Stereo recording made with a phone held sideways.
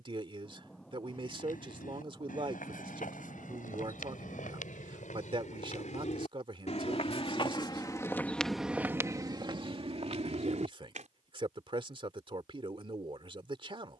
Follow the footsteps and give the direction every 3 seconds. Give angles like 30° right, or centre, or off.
80° left, 70° left, 30° left, 40° right, off.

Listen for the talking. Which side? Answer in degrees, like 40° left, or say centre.
40° right.